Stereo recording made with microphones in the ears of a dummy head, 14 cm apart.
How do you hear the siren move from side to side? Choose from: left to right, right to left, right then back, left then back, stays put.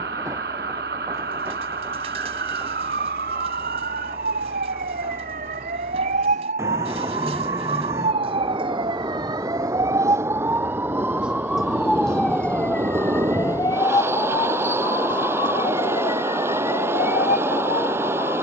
right to left.